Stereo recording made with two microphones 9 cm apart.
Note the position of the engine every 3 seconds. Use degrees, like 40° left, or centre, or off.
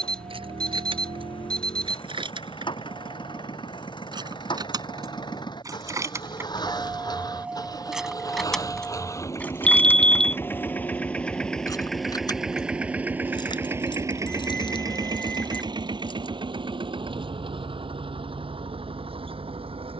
60° left, 50° left, 40° left, 20° left, 20° right, 60° right, 70° right.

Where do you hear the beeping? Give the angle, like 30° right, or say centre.
10° left.